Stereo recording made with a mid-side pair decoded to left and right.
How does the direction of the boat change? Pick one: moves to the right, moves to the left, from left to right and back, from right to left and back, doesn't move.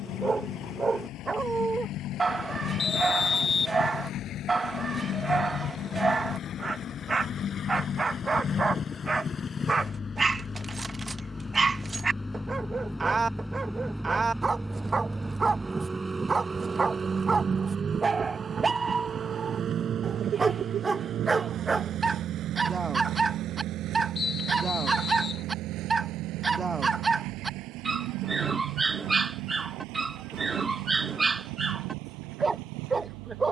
moves to the right.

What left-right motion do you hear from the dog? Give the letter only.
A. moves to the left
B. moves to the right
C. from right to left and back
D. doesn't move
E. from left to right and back
D.